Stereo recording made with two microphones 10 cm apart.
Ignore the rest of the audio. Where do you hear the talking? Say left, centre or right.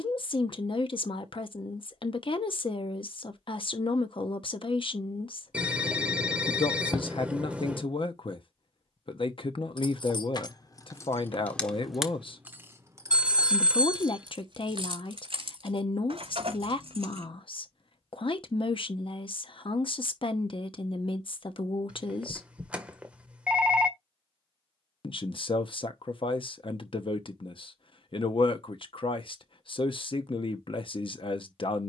left.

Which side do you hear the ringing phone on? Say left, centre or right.
centre.